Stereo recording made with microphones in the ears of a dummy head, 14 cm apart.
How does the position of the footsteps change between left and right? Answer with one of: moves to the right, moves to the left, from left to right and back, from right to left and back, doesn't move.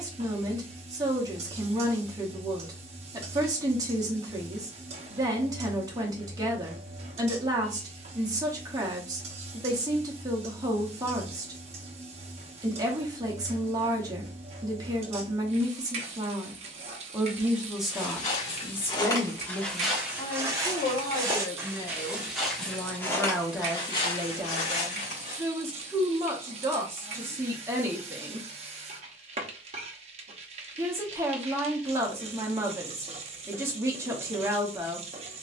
from left to right and back.